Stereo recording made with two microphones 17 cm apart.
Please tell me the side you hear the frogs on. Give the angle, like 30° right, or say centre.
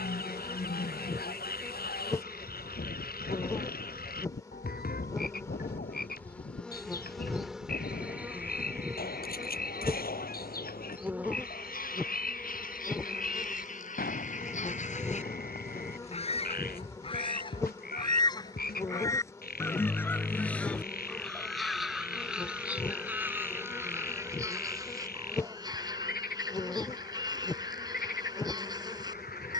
70° left.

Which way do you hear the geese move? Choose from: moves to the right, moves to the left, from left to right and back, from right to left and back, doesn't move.
moves to the right.